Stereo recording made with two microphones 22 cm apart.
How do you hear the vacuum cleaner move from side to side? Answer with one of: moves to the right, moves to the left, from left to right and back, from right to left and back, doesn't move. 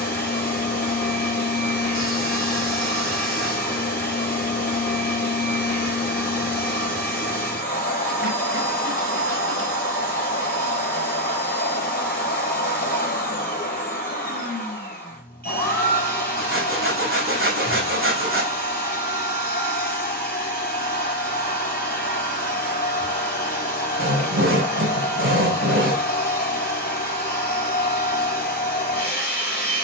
doesn't move.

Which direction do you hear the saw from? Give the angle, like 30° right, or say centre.
60° right.